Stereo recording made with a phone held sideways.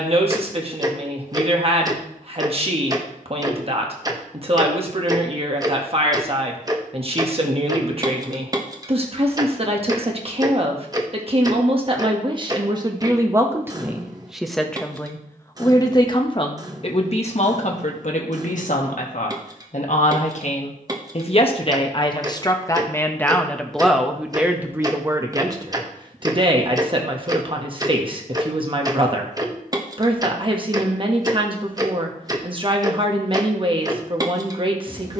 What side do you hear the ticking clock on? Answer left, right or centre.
right.